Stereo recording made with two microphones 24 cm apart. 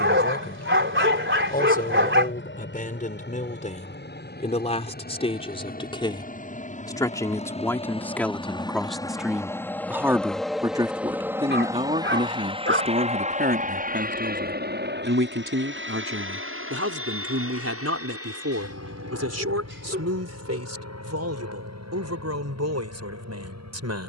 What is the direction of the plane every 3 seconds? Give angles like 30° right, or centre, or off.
50° left, 40° left, 30° left, centre, 30° right, 50° right, 60° right, 70° right.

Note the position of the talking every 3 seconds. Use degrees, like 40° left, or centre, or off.
30° left, 30° left, 10° left, 10° right, 40° right, 60° right, 70° right, 80° right.